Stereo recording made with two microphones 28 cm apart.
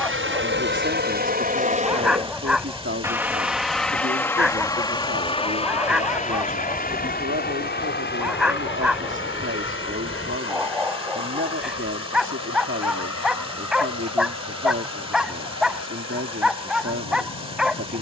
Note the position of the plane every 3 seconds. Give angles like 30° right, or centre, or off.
30° right, 10° left, 30° left, 40° left, 50° left, 50° left.